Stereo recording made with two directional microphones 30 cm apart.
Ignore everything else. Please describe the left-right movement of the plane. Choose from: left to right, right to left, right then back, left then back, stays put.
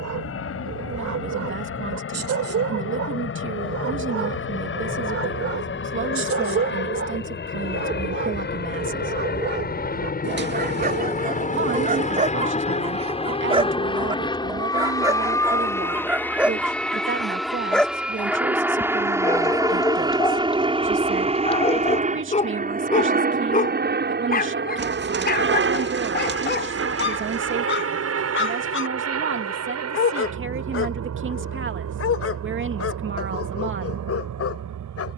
left to right.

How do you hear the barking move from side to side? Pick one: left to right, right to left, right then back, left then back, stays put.
right to left.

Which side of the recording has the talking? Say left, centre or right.
right.